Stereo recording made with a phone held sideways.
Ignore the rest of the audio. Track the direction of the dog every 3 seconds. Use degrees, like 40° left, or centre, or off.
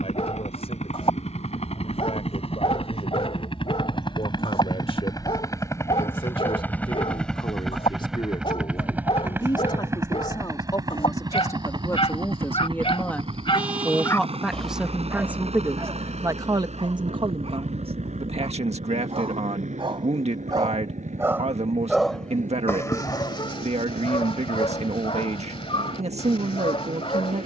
50° left, 50° left, 50° left, 50° left, 30° left, 40° right, 40° right, 20° left, 40° left.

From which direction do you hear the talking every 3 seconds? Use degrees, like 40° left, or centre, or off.
50° left, 50° left, 40° left, 30° left, 10° left, 30° right, 50° right, 50° right, 50° right.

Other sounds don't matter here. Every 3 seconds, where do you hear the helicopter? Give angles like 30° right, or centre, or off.
50° left, 30° left, centre, 20° right, 40° right, 50° right, 60° right, 60° right, 70° right.